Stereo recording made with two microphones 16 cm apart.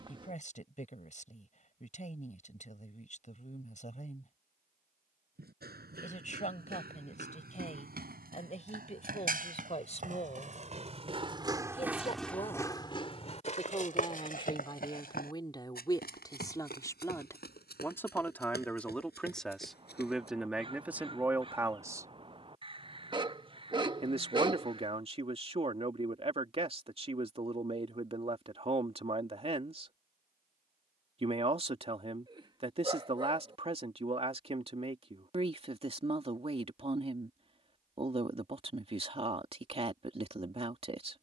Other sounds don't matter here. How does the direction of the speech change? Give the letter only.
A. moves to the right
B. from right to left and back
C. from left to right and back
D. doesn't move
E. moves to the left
A.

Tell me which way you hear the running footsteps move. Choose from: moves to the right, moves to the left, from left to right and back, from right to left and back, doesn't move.
moves to the left.